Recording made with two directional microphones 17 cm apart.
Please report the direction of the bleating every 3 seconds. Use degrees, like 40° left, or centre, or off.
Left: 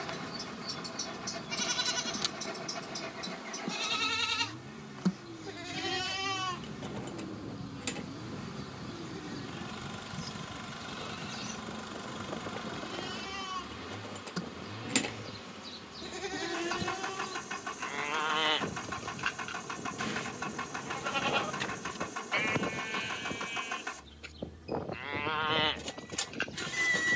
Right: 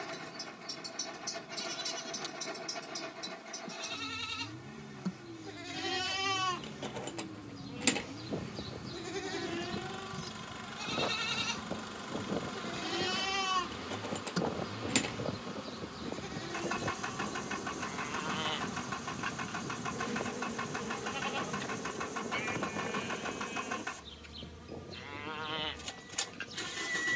50° left, 40° left, 30° right, 60° right, 30° right, 30° left, 40° left, 40° left, 40° left.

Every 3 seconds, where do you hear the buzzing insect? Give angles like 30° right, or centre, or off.
60° left, 50° left, 30° left, 10° left, 10° right, 20° right, 40° right, 40° right, 50° right.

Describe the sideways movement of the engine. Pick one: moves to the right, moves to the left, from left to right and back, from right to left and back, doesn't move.
doesn't move.